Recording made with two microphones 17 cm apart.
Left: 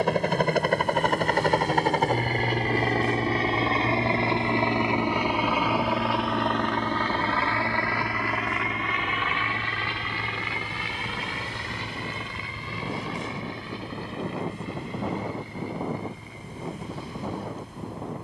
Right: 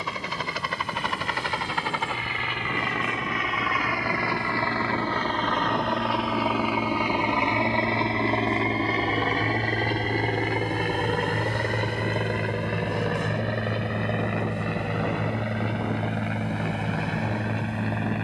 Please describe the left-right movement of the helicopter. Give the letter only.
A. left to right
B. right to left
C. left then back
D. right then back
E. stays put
A.